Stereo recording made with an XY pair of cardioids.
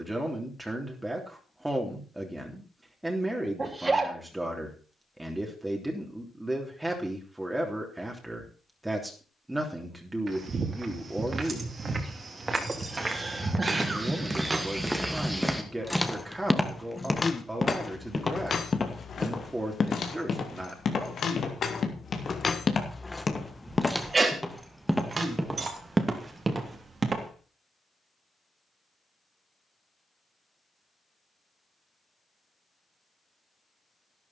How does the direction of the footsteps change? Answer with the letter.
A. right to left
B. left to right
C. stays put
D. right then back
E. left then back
E.